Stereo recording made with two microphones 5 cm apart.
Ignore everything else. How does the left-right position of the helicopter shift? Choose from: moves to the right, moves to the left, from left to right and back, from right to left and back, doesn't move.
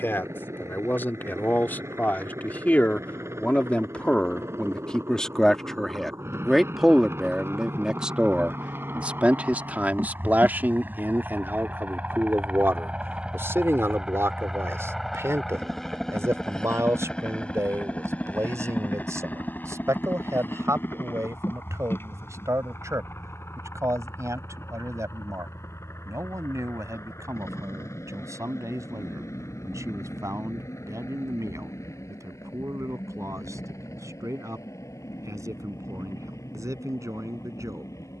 moves to the left.